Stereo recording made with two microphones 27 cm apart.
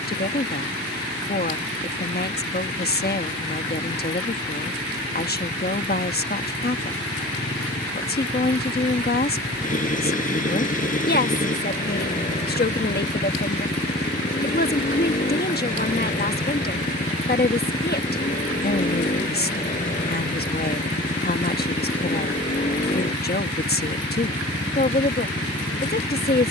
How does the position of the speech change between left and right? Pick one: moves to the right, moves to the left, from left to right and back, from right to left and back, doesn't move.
doesn't move.